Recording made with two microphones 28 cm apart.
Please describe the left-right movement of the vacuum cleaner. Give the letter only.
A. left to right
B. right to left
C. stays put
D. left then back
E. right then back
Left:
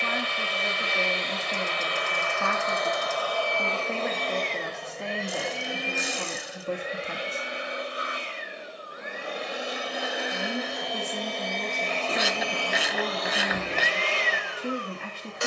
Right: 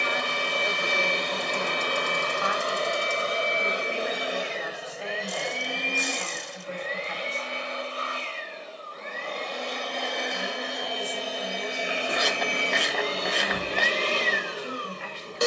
D.